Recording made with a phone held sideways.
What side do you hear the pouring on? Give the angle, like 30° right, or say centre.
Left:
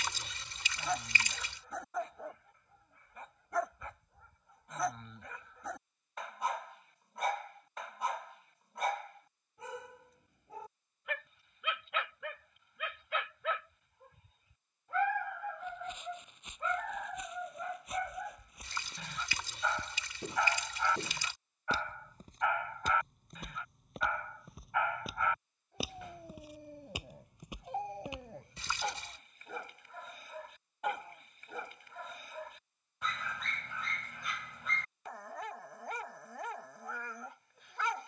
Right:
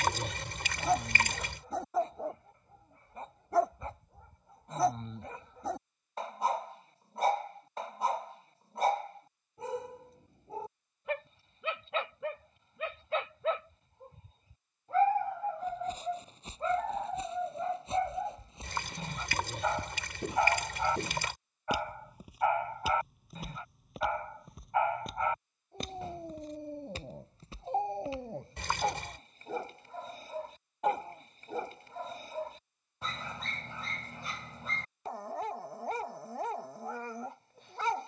60° right.